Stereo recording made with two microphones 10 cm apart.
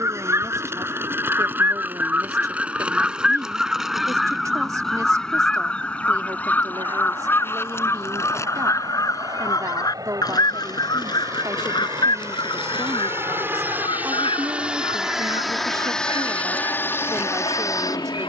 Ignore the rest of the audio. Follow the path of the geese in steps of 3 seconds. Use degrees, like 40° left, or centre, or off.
20° right, centre, 20° left, 40° left, 50° left, 60° left.